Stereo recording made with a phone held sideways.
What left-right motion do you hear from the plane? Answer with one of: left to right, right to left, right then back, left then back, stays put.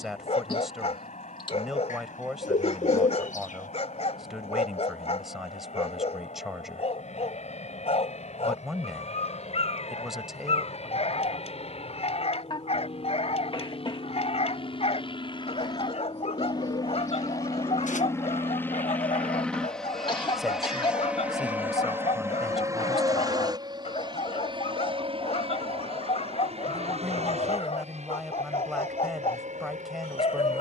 left to right.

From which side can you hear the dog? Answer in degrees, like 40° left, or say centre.
50° left.